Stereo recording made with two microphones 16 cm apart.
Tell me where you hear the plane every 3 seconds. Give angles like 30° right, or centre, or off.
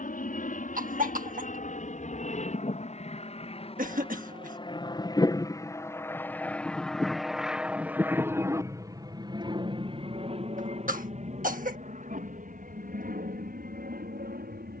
50° left, 30° left, centre, 30° right, 50° right.